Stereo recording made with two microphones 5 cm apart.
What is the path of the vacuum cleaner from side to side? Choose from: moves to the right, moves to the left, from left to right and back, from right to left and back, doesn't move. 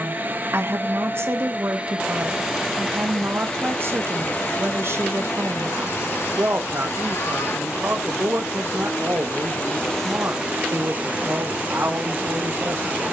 from right to left and back.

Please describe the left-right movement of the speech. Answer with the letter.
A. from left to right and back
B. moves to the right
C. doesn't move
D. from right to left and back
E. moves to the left
C.